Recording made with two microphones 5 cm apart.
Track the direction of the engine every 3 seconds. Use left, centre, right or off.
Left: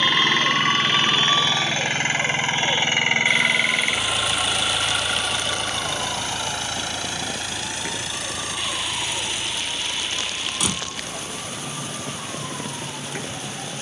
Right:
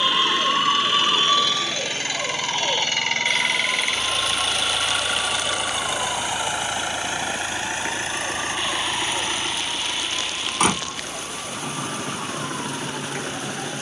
left, centre, right, right, right.